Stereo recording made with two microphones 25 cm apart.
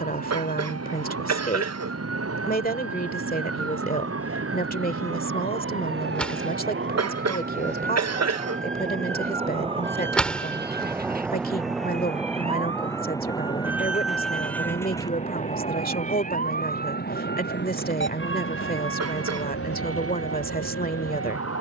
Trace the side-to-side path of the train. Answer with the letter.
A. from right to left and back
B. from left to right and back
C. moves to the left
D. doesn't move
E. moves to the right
C.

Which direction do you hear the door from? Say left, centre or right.
centre.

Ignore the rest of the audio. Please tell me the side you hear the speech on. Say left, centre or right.
left.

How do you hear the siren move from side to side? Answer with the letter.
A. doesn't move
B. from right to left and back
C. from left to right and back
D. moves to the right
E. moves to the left
E.